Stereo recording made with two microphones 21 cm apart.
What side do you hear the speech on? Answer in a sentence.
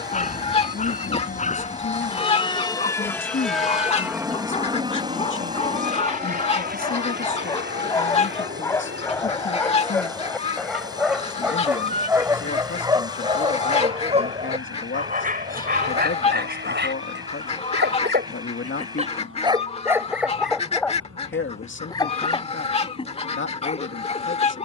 You can hear the speech on the left.